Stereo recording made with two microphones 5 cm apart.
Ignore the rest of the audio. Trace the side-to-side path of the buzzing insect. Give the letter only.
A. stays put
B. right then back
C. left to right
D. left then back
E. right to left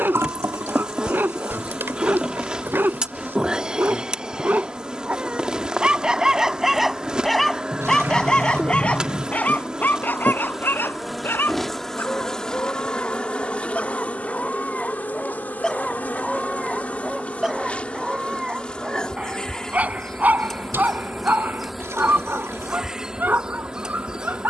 D.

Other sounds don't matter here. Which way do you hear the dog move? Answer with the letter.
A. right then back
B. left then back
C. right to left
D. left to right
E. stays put
B.